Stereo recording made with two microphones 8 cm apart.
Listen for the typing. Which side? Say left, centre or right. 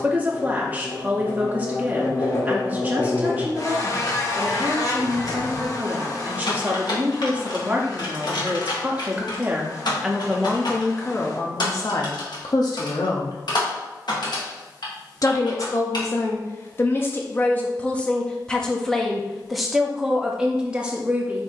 left.